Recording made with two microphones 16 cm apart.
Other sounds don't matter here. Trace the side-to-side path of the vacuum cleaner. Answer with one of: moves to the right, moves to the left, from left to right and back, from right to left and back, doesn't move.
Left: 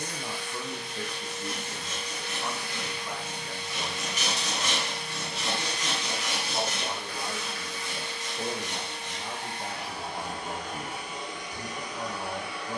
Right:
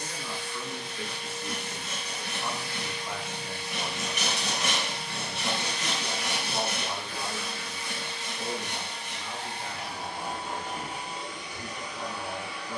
doesn't move.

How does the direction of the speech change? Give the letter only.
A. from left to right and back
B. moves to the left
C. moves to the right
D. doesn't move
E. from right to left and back
A.